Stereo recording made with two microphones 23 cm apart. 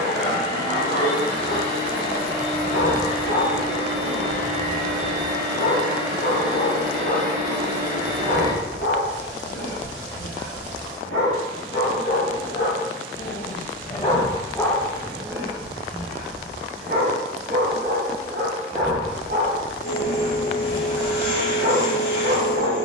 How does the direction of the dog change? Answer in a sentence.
You can hear the dog travel towards the right.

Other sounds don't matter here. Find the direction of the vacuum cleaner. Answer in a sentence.
In this clip you hear the vacuum cleaner on the left.